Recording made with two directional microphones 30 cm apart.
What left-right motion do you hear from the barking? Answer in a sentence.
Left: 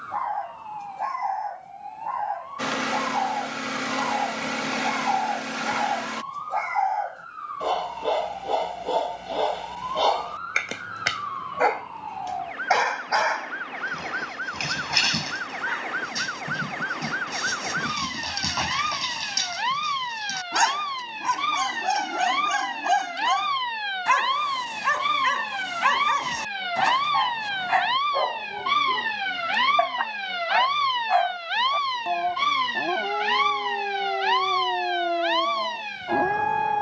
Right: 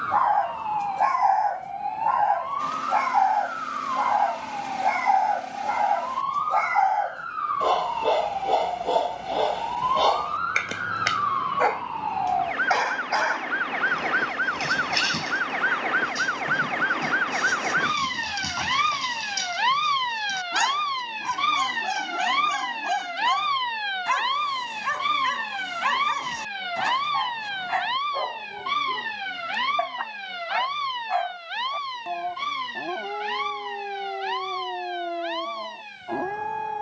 You can hear the barking move to the left.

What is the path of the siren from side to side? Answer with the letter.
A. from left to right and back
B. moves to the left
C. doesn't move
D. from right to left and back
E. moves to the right
B.